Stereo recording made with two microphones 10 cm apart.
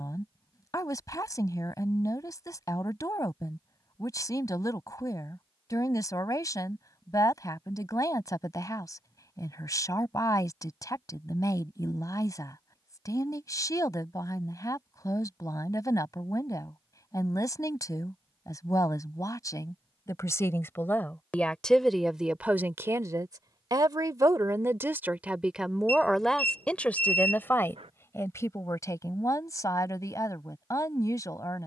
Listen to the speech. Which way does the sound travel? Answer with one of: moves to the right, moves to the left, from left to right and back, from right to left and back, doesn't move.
from left to right and back.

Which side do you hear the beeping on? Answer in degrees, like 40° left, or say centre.
70° right.